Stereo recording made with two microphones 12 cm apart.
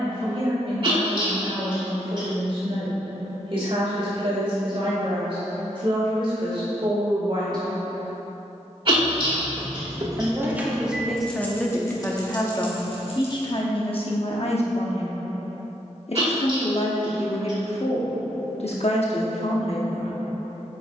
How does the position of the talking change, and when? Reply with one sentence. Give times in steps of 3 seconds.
In this clip you hear the talking on the right from 0 s, in the centre from 9 s and on the left from 12 s.